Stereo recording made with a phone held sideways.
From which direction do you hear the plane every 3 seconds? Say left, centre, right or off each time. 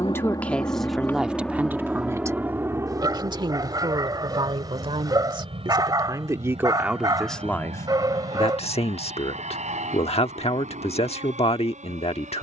centre, right, right, right.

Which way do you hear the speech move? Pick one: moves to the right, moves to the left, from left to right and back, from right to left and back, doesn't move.
from left to right and back.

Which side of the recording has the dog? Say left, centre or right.
right.